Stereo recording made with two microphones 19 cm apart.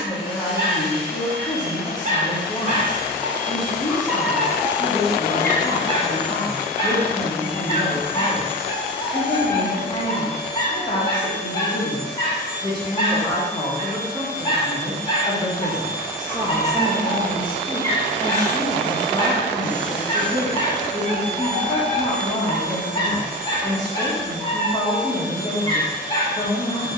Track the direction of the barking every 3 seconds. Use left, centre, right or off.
right, centre, left, left, left, left, left, left, left.